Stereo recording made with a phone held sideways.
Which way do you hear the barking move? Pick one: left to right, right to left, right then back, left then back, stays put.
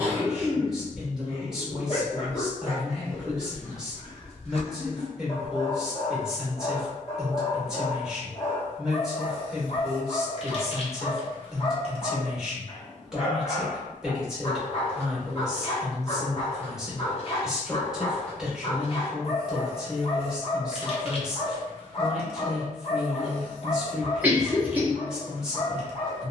stays put.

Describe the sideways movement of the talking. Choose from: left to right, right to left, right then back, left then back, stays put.
stays put.